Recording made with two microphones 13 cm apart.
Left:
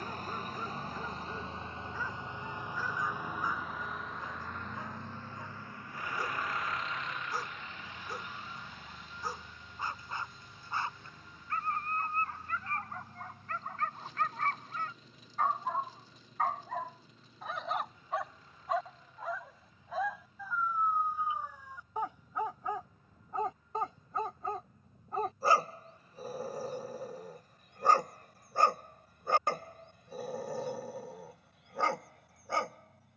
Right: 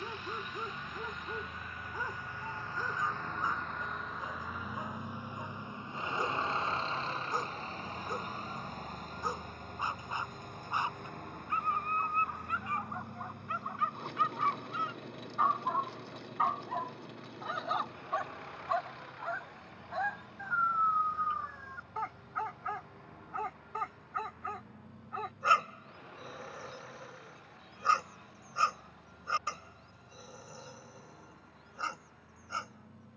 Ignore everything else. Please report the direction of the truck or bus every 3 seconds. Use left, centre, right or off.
left, centre, right, right, right, right, right, right, right, right, right.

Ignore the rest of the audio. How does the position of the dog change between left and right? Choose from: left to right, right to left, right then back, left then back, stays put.
right to left.